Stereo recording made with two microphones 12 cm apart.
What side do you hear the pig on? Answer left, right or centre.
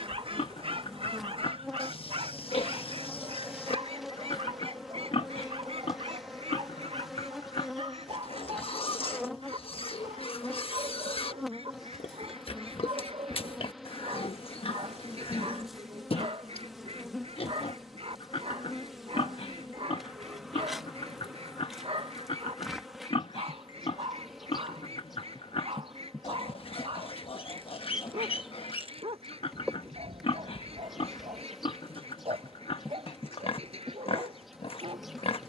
left.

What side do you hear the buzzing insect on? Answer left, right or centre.
centre.